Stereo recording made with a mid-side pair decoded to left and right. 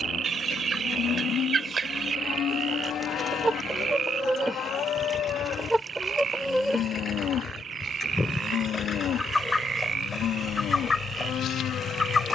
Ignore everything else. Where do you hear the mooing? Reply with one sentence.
In this clip you hear the mooing on the left.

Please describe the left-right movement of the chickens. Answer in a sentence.
You can hear the chickens go from the right side to the left.